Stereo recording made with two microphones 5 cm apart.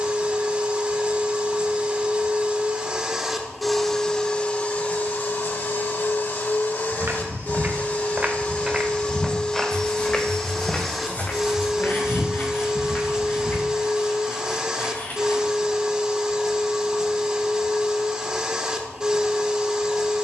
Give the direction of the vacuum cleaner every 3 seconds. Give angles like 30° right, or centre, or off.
20° right, 20° left, 40° left, 10° left, 20° right, 20° right, 20° right.